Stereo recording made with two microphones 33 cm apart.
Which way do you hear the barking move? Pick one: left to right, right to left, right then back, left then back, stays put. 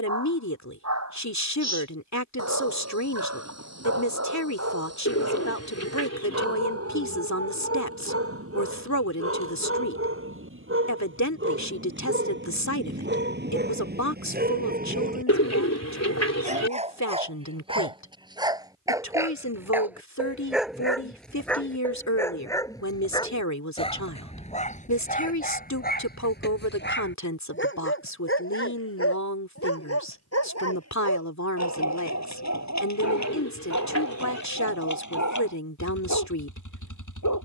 right to left.